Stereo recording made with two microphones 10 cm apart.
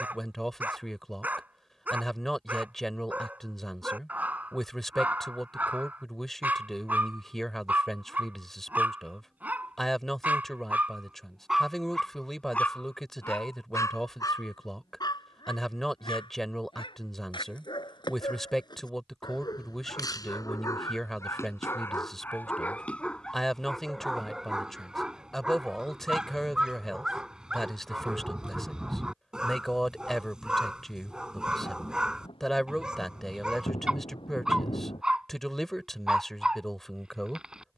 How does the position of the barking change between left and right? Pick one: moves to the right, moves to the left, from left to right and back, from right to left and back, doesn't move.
from right to left and back.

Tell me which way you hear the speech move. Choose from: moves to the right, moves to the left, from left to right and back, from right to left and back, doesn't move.
doesn't move.